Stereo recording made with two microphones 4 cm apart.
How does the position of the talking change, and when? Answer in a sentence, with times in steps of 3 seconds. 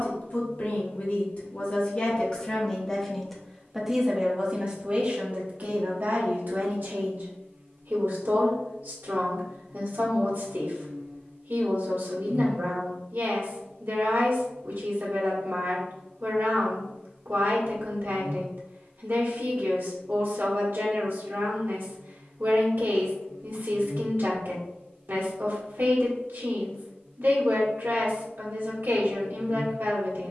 You can hear the talking on the left from 0 s and on the right from 3 s.